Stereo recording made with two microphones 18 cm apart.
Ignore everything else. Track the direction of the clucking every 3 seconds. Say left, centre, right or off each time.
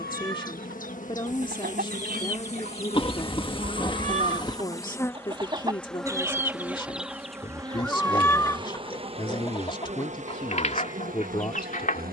right, right, centre, left.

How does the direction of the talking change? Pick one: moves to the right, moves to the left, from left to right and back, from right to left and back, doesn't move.
doesn't move.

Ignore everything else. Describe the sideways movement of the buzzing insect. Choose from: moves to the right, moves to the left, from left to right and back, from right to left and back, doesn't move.
moves to the right.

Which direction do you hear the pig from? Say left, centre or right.
left.